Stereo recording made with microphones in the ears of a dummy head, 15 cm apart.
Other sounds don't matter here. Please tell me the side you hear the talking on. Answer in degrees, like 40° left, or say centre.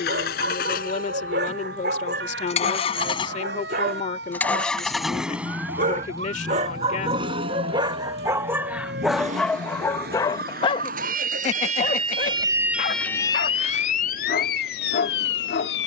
50° left.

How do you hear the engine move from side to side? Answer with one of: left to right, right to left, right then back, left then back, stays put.
left to right.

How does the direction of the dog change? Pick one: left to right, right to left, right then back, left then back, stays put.
right to left.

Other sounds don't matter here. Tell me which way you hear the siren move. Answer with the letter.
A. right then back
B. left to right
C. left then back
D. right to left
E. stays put
D.